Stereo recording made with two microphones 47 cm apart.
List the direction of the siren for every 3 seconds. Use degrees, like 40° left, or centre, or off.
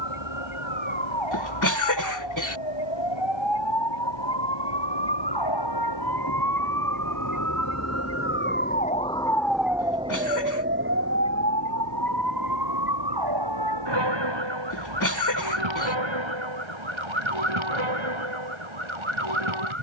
70° left, 60° left, 40° left, 20° right, 50° right, 70° right, 70° right.